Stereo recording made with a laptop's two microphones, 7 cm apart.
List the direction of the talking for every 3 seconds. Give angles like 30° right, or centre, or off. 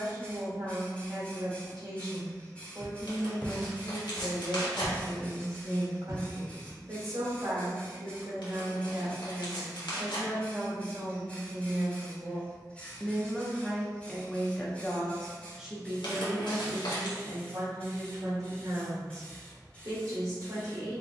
50° right, 50° right, 40° right, 30° right, centre, 30° right, 50° right.